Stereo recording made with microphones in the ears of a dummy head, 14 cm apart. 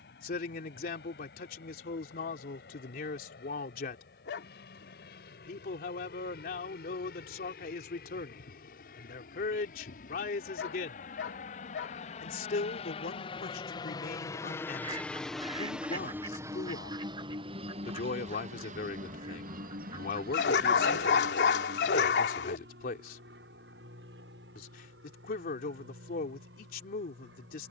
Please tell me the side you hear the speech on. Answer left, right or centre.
left.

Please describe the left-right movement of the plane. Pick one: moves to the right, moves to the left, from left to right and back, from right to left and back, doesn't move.
moves to the right.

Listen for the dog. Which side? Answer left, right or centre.
left.